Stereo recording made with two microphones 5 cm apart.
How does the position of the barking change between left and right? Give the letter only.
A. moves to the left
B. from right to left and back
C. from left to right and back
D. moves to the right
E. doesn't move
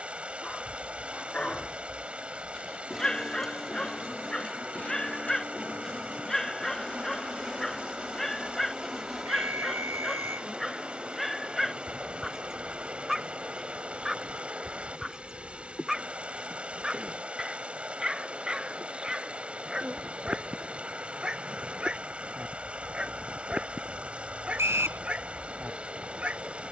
D.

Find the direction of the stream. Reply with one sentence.
You can hear the stream on the right.